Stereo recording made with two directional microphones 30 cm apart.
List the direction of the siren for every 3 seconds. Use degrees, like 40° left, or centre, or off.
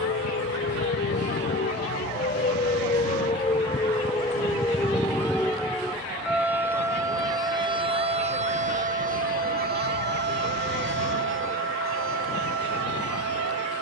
30° left, 10° left, 10° right, 40° right, 50° right.